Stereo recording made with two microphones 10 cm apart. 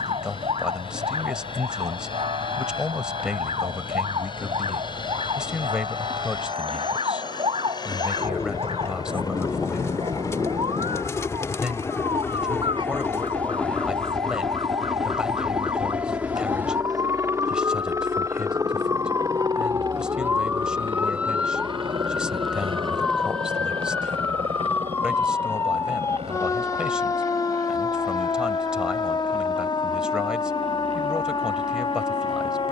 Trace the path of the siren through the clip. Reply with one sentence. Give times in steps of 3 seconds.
You can hear the siren on the right from 0 s, in the centre from 21 s and on the left from 24 s.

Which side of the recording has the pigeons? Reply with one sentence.
In this clip you hear the pigeons on the left.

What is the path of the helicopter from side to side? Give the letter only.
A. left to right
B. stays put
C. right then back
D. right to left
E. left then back
A.